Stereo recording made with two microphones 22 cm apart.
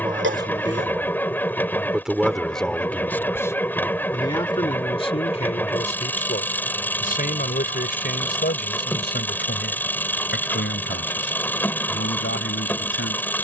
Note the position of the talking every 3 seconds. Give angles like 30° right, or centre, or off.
10° right, 20° left, 40° left, 60° left, 60° left.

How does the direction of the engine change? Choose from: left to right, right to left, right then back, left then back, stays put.
stays put.